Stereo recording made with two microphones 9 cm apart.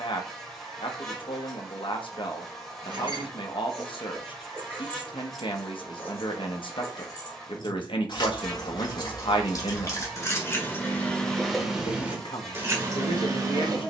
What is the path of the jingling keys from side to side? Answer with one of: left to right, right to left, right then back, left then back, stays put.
left then back.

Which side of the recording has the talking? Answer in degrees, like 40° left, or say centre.
70° left.